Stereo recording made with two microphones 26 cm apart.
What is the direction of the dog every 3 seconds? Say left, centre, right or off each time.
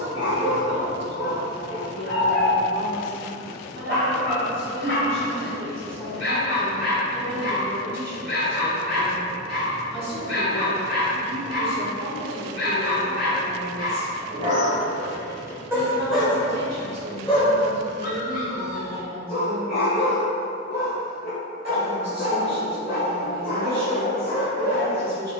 right, right, right, right, right, centre, left, left, left.